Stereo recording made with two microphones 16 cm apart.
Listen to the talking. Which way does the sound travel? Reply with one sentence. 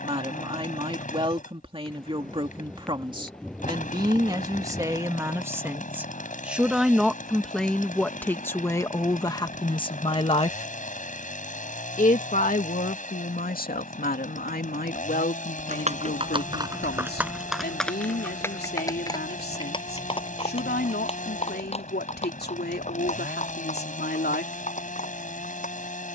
In this clip you hear the talking move to the left.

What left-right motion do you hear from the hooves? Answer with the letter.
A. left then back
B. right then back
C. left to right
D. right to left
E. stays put
D.